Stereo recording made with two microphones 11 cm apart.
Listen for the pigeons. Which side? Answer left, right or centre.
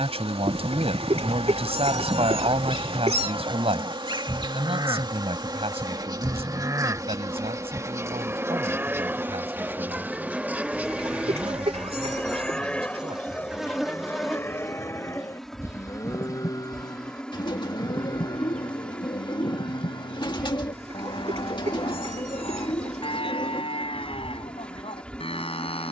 left.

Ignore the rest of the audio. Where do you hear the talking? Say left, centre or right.
right.